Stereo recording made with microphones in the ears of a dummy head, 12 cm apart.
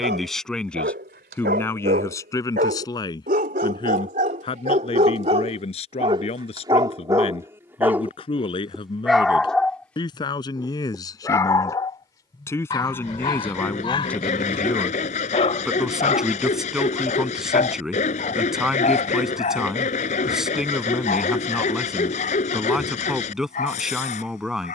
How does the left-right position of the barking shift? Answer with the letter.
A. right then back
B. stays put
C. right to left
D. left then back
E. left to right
C.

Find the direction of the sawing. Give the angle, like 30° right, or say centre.
50° left.